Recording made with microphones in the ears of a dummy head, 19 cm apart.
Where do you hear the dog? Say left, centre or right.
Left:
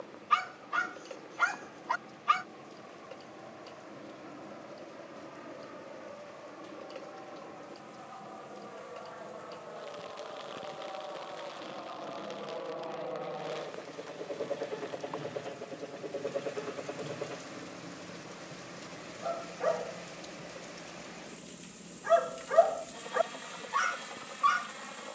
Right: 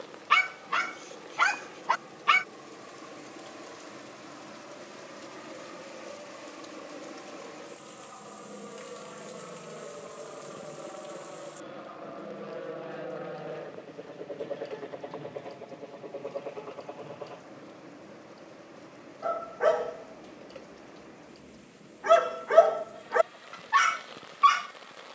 right.